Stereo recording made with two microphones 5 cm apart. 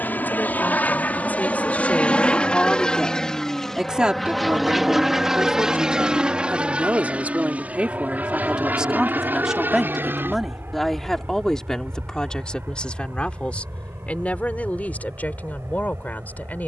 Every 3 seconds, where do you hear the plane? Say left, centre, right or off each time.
left, centre, right, right, right, right.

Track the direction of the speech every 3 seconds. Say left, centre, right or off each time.
left, right, right, centre, left, left.